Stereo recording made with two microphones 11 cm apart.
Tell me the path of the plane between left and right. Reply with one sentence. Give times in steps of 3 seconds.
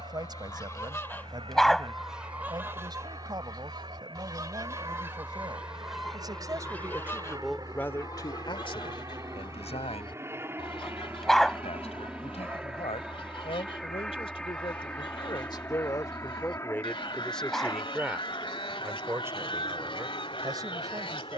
You can hear the plane on the right from 0 s, in the centre from 12 s and on the left from 15 s.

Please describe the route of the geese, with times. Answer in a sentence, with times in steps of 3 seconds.
You can hear the geese in the centre from 0 s, on the right from 3 s and on the left from 6 s.